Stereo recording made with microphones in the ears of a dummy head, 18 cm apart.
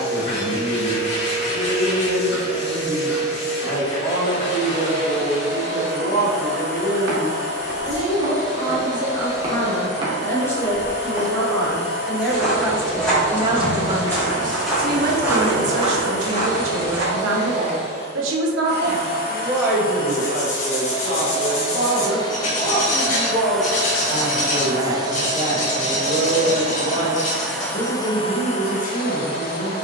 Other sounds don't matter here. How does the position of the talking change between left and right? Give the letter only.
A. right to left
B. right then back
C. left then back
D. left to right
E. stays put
B.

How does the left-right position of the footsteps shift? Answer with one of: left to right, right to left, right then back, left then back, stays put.
left then back.